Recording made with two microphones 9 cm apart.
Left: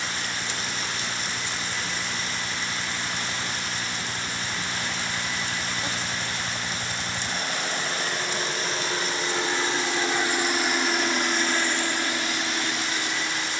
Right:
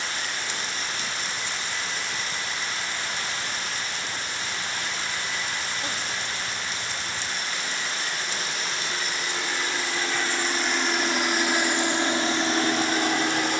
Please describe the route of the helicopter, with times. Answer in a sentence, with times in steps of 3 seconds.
You can hear the helicopter on the left from 0 s, in the centre from 9 s and on the right from 12 s.